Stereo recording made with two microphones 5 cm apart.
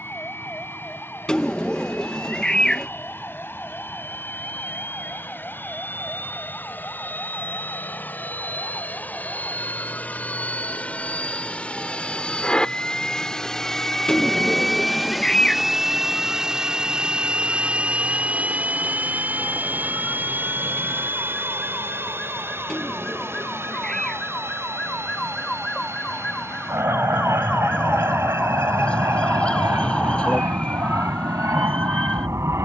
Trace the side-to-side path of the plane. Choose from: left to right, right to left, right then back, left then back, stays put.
left to right.